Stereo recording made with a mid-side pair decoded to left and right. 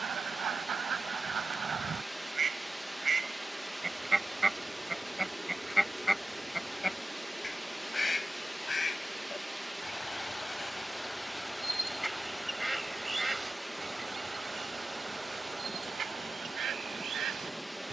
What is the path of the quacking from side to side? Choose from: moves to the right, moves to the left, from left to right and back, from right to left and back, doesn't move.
from right to left and back.